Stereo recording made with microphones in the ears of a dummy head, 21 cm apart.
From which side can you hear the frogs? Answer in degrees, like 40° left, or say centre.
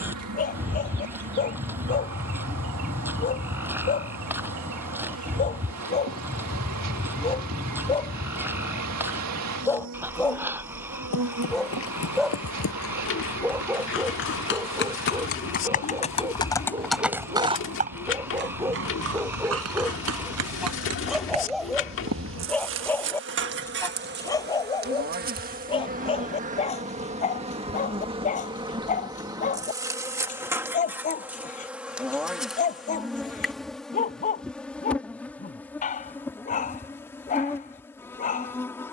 10° right.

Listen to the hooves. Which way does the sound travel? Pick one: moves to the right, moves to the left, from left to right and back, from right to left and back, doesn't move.
moves to the right.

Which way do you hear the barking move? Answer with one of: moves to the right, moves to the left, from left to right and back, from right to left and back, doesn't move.
from left to right and back.